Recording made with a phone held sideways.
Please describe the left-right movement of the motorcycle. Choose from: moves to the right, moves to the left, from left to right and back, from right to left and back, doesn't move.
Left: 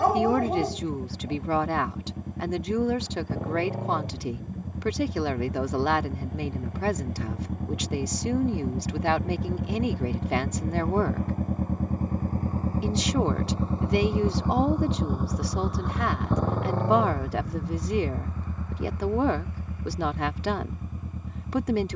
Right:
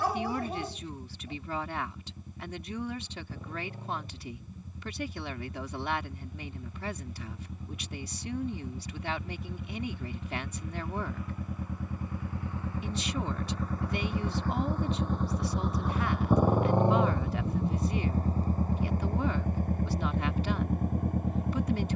moves to the right.